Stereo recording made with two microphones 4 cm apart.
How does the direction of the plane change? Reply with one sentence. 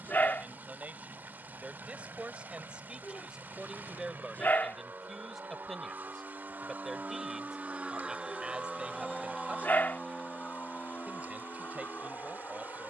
You can hear the plane move from right to left.